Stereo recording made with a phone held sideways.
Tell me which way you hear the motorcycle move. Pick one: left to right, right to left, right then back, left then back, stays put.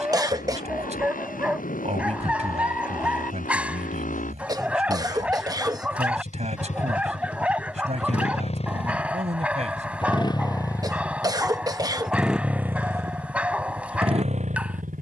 left to right.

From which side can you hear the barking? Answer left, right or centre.
centre.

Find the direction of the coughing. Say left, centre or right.
right.